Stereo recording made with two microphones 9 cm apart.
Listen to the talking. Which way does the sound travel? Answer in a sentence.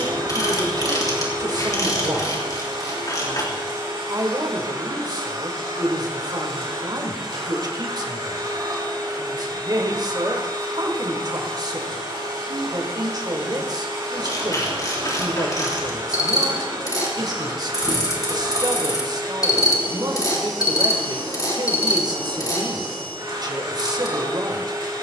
You can hear the talking stay in one place.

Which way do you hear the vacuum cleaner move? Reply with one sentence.
You can hear the vacuum cleaner stay put.